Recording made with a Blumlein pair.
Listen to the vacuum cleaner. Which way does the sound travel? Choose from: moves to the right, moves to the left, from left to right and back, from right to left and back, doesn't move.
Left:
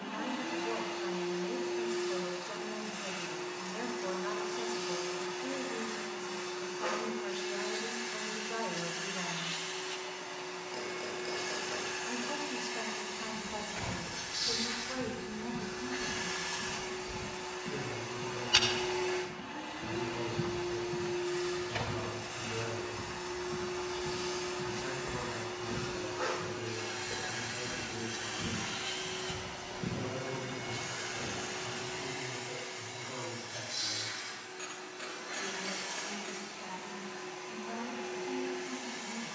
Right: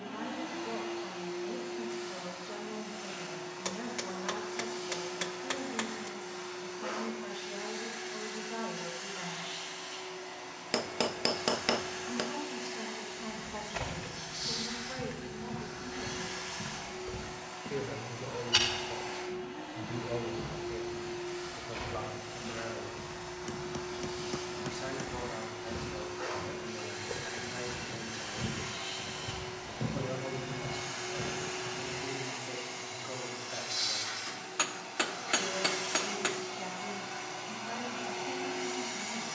moves to the right.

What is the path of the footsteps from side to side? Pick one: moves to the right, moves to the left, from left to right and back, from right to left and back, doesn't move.
from right to left and back.